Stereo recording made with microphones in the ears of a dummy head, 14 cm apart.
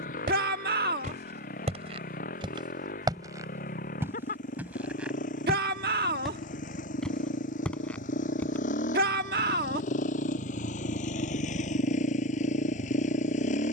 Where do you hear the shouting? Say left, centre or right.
right.